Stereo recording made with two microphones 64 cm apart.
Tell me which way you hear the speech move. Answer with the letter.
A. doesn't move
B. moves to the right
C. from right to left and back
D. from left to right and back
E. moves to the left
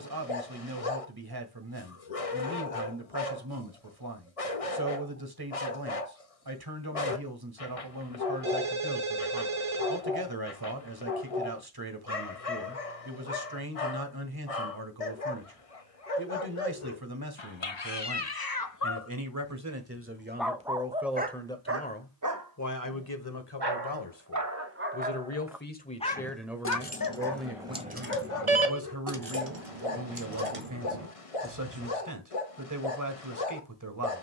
C.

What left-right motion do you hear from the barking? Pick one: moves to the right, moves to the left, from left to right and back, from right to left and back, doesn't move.
from left to right and back.